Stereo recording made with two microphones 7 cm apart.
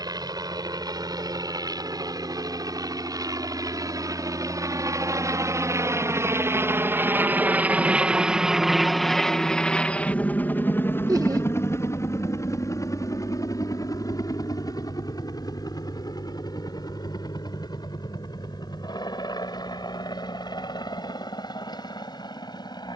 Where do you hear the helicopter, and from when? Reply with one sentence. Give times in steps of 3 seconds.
You can hear the helicopter on the right from 0 s and on the left from 9 s.